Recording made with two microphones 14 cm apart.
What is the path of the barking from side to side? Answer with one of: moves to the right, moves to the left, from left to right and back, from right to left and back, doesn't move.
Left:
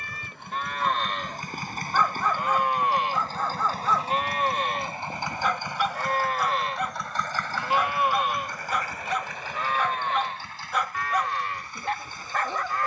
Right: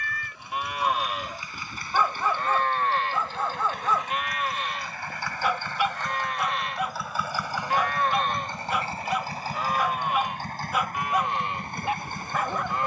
doesn't move.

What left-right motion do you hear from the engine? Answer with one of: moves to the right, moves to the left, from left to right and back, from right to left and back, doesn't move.
moves to the right.